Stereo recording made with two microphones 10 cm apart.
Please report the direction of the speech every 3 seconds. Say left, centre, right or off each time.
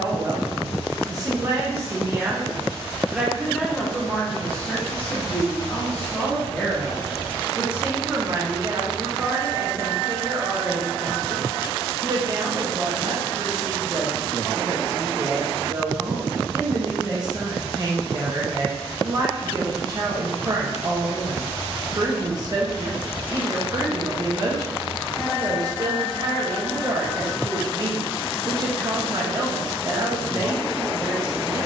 right, centre, centre, right, right, right, right, right, right, right, right.